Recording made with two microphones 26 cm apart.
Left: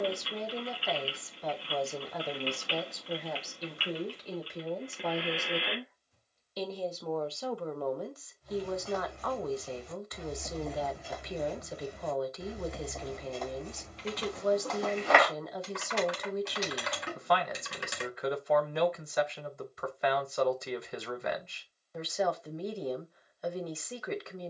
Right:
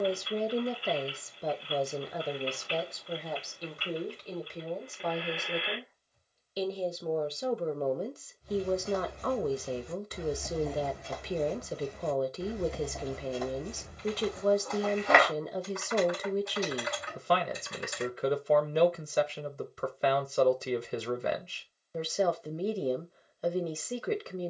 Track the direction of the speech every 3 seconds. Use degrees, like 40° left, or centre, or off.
20° right, centre, 20° right, 30° right, 30° right, 30° right, 30° right, 30° right.